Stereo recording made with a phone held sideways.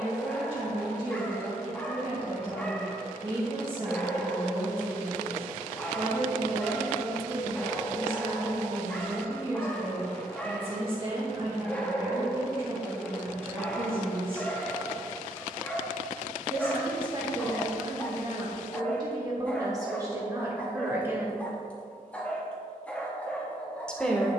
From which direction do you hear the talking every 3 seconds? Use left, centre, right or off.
right, right, right, right, right, right, right, centre.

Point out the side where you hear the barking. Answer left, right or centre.
centre.